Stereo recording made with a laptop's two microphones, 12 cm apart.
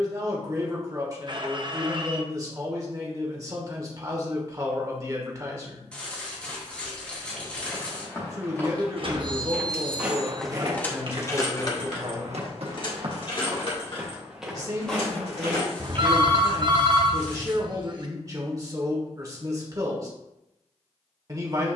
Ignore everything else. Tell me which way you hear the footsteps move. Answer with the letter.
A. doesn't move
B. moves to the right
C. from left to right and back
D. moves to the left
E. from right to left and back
C.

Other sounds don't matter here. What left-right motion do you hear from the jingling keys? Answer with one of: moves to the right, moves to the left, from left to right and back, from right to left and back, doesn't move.
moves to the left.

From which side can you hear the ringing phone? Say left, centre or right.
right.